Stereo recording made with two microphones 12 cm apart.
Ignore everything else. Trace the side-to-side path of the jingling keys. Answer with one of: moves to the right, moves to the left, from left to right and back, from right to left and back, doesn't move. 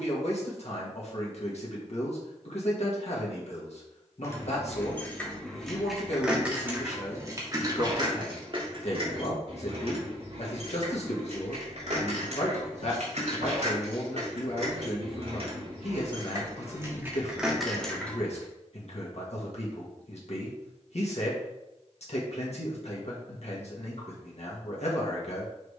from left to right and back.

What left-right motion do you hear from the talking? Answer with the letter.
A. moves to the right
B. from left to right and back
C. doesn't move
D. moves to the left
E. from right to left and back
C.